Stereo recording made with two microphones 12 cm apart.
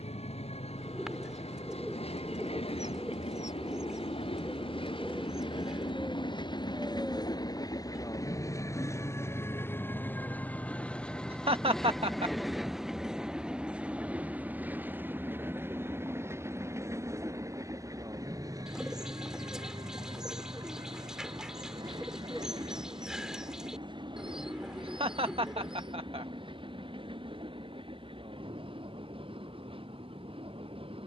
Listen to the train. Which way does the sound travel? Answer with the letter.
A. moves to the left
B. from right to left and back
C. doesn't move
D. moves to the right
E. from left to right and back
D.